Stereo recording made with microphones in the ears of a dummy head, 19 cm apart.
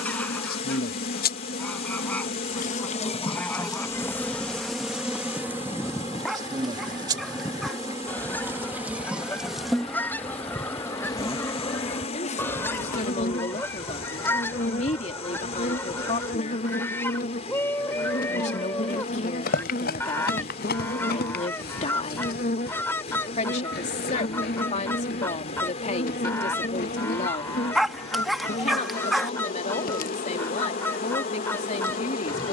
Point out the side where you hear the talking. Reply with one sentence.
In this clip you hear the talking on the left.